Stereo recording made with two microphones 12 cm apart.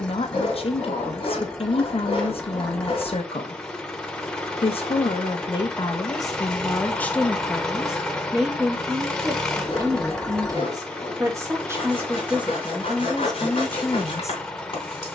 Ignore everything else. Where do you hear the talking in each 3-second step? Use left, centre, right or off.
left, left, centre, right, centre.